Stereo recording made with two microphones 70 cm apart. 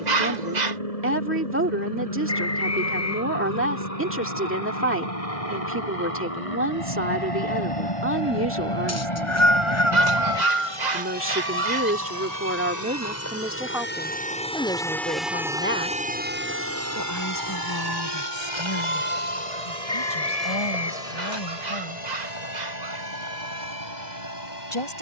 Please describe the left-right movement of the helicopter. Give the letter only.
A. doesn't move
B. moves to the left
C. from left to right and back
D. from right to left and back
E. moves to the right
E.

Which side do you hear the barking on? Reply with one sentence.
You can hear the barking on the right.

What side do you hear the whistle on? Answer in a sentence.
You can hear the whistle on the left.